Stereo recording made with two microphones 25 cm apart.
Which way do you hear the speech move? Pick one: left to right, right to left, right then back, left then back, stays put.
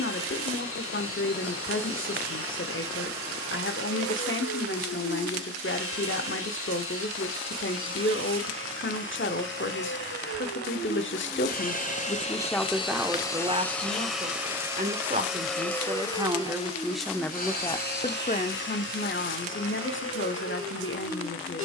right then back.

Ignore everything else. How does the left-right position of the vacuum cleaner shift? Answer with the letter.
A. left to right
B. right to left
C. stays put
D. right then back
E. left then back
D.